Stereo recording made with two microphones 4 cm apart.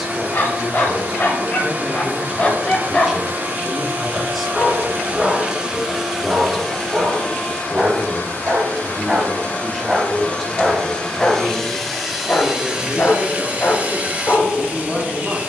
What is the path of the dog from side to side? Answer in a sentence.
In this clip you hear the dog go right and come back.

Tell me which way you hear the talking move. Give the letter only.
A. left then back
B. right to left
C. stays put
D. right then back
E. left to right
C.